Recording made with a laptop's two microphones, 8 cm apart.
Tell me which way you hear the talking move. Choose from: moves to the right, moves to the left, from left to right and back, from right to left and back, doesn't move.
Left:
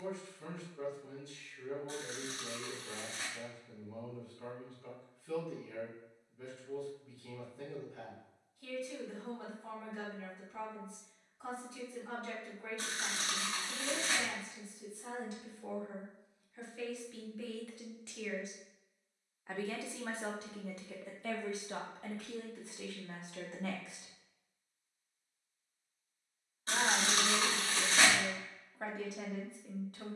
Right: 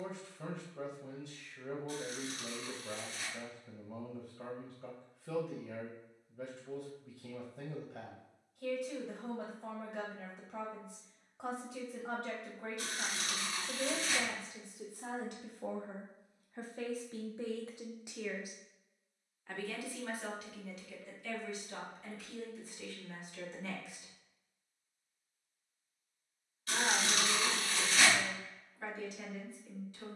moves to the left.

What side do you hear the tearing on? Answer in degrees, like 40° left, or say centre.
30° left.